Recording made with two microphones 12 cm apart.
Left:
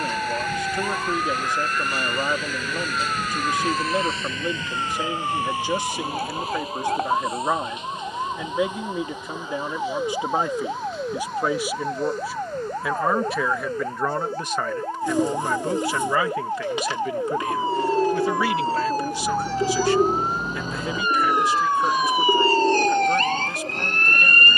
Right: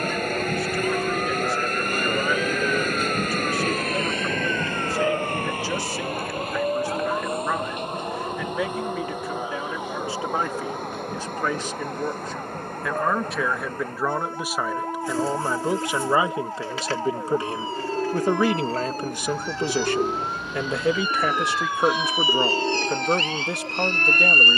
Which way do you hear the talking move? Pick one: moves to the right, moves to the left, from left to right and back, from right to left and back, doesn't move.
moves to the right.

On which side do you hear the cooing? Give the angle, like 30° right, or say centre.
20° left.